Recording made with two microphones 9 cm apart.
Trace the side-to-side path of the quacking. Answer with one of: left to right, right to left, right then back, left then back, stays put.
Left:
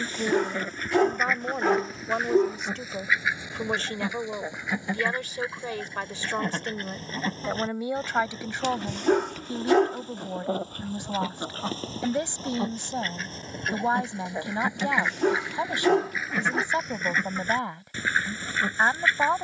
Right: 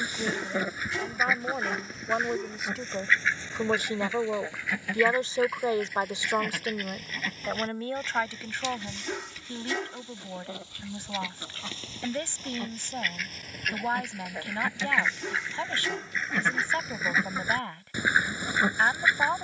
left then back.